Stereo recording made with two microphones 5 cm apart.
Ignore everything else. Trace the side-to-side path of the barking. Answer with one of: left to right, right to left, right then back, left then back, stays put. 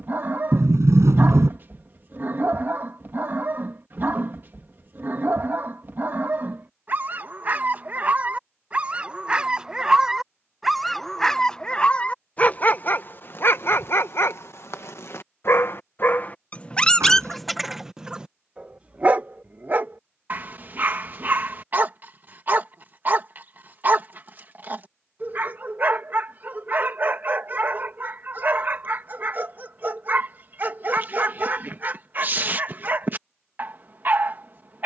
left then back.